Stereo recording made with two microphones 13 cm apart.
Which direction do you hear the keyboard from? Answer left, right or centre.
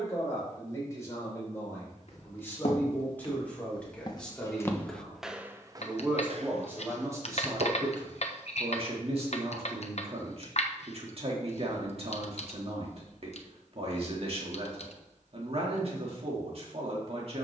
left.